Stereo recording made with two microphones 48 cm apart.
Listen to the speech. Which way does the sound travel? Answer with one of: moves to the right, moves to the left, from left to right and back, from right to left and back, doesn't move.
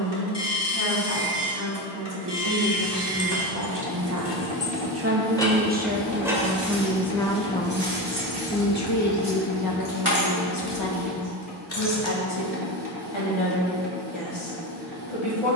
moves to the left.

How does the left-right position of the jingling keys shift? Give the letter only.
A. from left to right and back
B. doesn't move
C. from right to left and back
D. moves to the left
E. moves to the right
A.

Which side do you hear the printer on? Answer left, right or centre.
right.